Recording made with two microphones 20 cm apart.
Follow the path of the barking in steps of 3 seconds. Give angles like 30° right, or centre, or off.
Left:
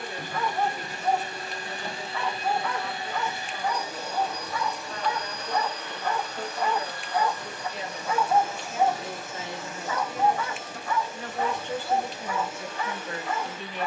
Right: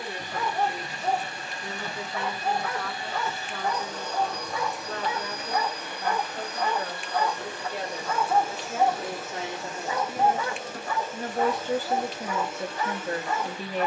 40° right, 30° right, 10° left, 30° right, 40° right.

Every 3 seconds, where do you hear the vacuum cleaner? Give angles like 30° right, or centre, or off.
40° left, centre, 30° right, 40° right, 50° right.